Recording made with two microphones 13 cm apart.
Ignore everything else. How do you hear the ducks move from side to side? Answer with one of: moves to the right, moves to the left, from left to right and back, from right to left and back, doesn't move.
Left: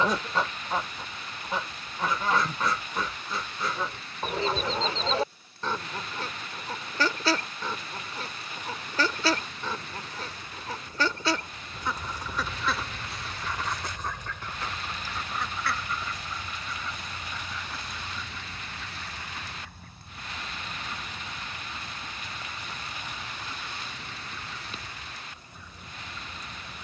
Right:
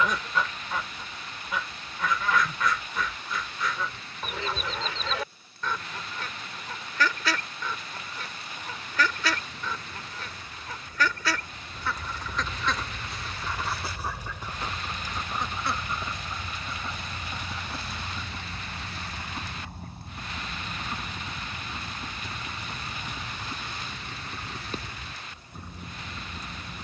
moves to the right.